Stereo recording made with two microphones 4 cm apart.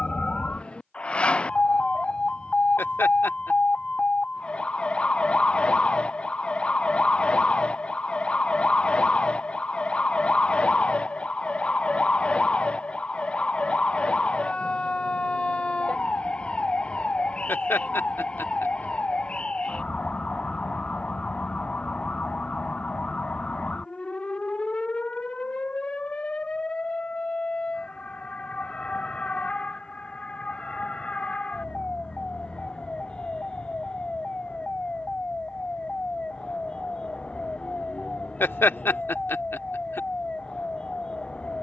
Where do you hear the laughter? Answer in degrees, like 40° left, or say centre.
60° left.